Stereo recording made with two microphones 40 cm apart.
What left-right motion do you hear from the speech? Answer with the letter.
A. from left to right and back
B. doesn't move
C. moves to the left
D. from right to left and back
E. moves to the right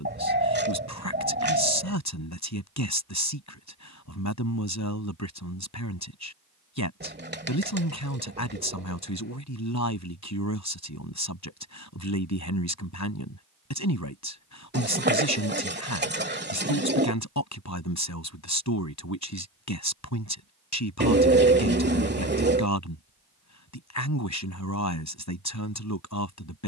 B.